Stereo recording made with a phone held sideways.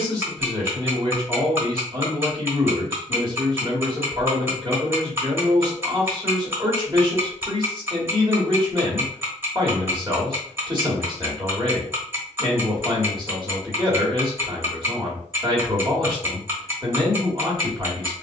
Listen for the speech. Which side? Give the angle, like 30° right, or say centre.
40° right.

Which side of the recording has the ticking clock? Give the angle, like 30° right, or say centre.
20° right.